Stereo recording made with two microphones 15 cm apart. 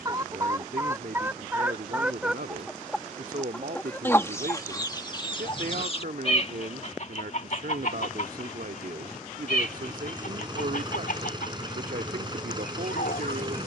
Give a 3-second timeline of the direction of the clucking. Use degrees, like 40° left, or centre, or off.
10° right, 20° left, 60° left, 70° left, 80° left.